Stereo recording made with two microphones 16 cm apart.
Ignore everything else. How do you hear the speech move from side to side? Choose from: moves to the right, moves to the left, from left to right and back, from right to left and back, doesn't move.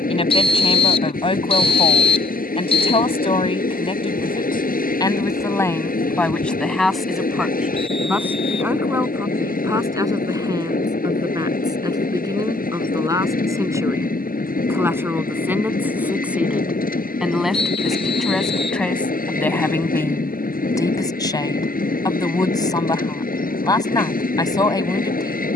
from left to right and back.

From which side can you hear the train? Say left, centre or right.
left.